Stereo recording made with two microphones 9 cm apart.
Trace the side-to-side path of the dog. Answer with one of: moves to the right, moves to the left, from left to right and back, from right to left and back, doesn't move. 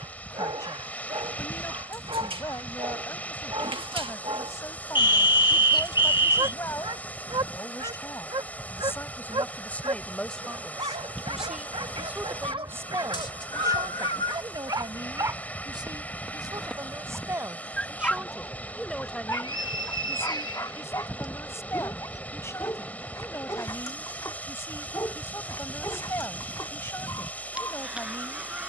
moves to the left.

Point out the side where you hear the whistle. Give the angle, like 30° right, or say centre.
50° left.